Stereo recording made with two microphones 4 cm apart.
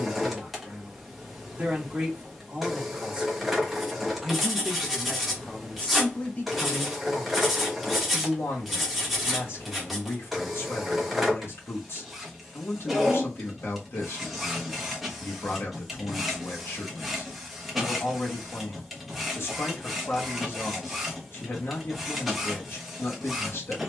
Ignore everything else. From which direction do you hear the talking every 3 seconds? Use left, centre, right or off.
right, centre, left, left, left, left, left, left.